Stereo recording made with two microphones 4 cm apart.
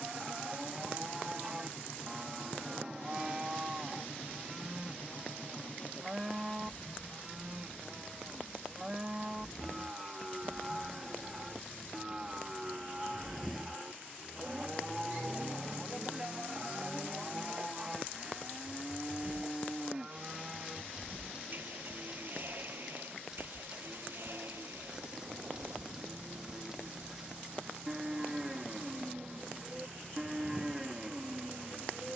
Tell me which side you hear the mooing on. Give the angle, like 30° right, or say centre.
20° right.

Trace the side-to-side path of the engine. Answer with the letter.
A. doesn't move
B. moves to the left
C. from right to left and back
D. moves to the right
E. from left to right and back
D.